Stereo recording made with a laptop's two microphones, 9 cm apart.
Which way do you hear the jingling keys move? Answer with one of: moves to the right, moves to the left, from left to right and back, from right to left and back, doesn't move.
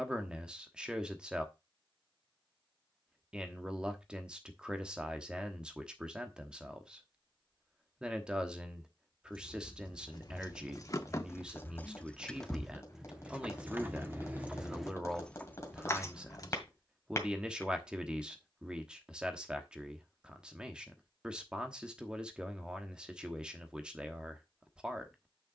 from left to right and back.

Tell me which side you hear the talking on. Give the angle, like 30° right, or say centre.
10° right.